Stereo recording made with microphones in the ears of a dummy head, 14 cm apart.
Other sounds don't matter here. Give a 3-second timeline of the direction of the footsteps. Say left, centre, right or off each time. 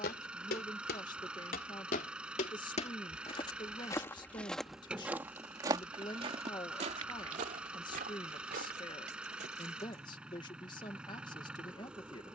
left, centre, right, off.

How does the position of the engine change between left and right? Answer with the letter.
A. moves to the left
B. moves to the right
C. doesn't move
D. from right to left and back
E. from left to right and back
C.